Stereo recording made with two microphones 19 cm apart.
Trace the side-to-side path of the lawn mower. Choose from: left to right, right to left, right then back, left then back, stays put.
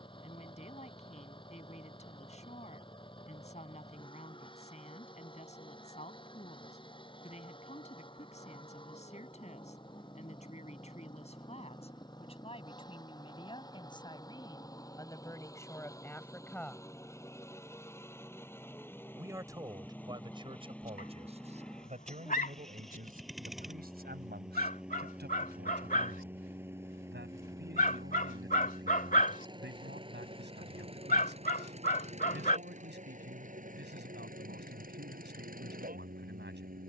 left to right.